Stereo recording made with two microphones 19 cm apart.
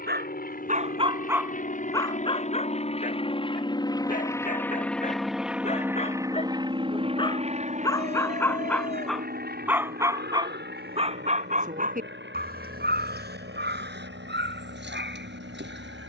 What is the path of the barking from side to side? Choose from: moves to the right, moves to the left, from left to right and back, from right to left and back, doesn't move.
from right to left and back.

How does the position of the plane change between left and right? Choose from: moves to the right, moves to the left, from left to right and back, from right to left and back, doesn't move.
moves to the right.